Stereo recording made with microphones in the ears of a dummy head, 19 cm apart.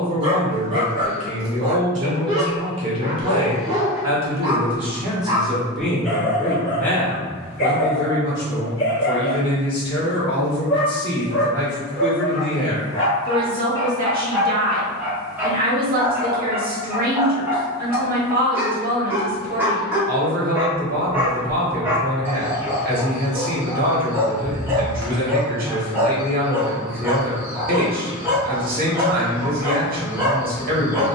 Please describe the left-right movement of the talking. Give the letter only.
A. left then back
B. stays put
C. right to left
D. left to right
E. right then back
A.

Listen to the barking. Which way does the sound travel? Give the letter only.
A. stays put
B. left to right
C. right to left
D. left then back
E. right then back
D.